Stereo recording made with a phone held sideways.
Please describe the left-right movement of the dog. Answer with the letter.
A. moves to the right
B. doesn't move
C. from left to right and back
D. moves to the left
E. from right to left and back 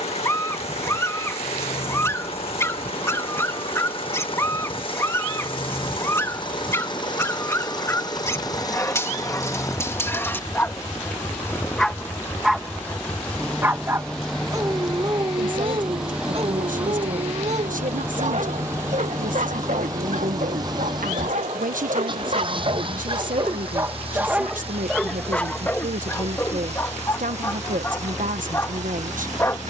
C.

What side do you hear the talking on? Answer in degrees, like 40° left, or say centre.
80° right.